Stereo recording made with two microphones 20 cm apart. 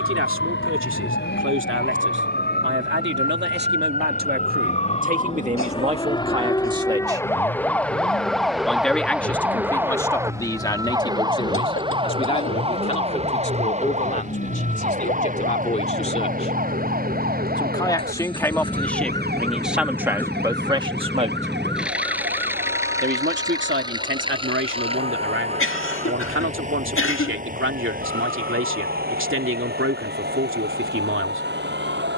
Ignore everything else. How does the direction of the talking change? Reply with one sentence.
In this clip you hear the talking go left and come back.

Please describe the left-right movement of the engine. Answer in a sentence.
You can hear the engine go from the left side to the right.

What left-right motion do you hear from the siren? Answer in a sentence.
In this clip you hear the siren move to the right.